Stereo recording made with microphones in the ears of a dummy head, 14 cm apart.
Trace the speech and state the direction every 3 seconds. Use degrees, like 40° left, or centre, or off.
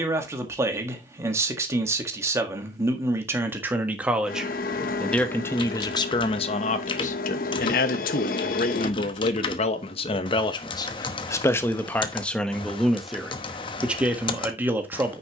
20° right, centre, 50° left, 30° left, centre.